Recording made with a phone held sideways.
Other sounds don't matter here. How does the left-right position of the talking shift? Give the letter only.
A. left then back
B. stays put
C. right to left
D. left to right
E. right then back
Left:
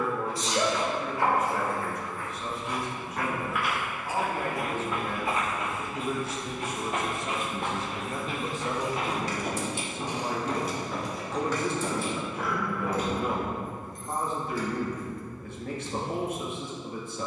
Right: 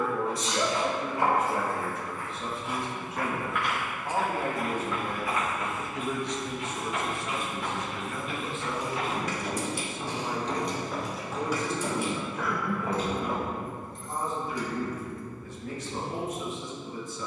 C.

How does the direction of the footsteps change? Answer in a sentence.
In this clip you hear the footsteps move from right to left and back again.